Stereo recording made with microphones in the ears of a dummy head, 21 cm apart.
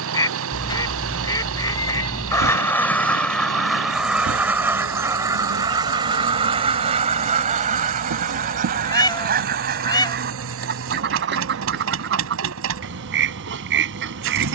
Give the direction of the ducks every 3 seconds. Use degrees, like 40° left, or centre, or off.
10° left, 10° right, 30° right, 40° right, 50° right.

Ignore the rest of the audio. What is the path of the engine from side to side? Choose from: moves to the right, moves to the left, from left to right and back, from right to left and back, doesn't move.
doesn't move.